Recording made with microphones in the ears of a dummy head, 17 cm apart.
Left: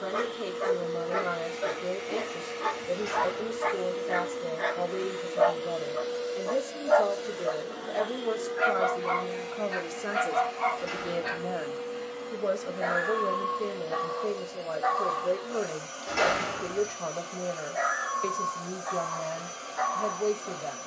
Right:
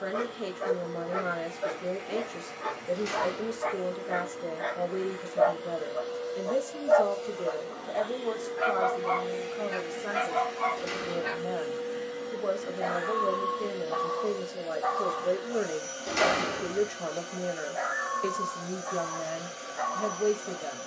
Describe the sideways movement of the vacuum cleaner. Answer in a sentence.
You can hear the vacuum cleaner move from left to right.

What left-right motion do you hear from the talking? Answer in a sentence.
You can hear the talking move from right to left and back again.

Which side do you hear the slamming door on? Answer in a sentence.
You can hear the slamming door on the right.